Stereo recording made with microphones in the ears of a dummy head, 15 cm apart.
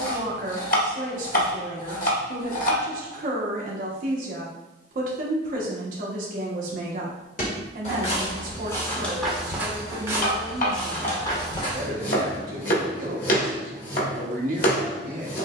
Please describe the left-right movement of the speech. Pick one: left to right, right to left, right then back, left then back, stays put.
stays put.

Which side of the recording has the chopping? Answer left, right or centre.
left.